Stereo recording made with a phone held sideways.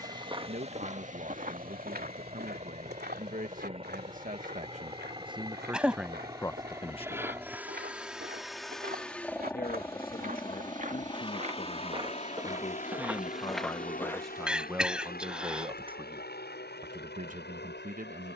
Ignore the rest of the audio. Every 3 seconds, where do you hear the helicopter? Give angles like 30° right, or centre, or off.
40° right, 30° right, 10° right, 20° left, 50° left, 70° left.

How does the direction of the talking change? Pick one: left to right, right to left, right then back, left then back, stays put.
left then back.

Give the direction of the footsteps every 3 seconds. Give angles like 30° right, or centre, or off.
50° right, 70° right, 70° right, 50° right, centre, off.